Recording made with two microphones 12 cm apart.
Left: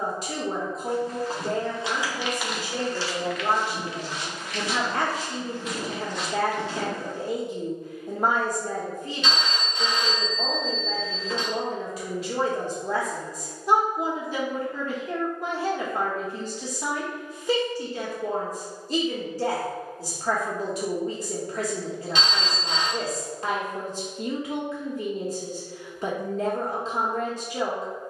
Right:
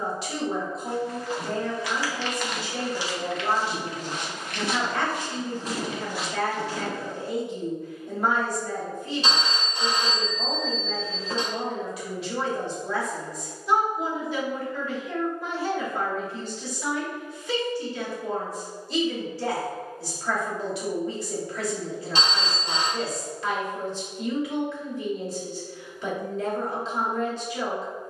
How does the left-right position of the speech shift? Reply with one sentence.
You can hear the speech stay put.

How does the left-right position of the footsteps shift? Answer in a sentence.
In this clip you hear the footsteps go right and come back.